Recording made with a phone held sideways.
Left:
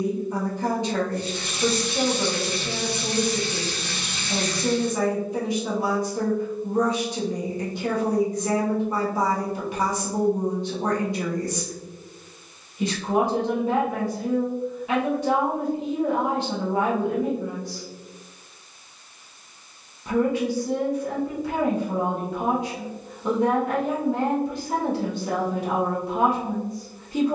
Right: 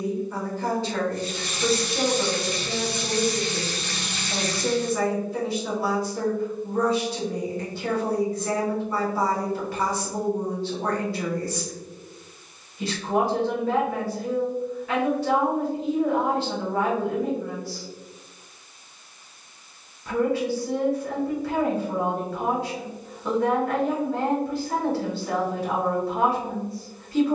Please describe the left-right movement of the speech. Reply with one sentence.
In this clip you hear the speech stay put.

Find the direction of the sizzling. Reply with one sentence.
In this clip you hear the sizzling in the centre.